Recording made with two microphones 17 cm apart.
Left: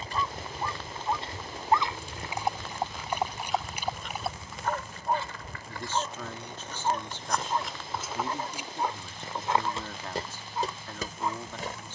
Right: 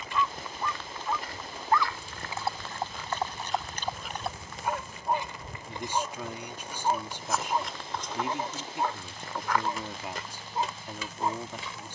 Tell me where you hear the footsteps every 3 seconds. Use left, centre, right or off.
left, centre, centre, left.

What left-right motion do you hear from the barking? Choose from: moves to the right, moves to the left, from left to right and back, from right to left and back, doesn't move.
moves to the right.